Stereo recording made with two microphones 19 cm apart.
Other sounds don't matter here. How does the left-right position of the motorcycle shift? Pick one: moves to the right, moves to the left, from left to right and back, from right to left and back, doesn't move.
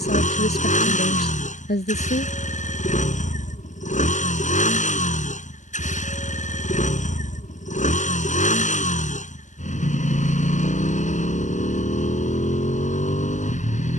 doesn't move.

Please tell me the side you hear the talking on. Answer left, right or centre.
left.